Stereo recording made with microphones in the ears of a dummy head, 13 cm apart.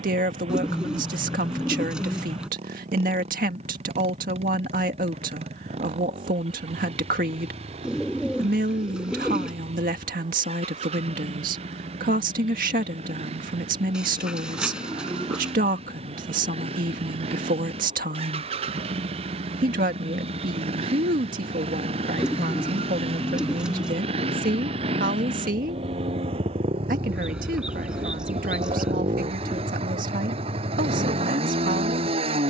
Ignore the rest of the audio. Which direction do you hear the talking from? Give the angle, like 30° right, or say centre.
60° right.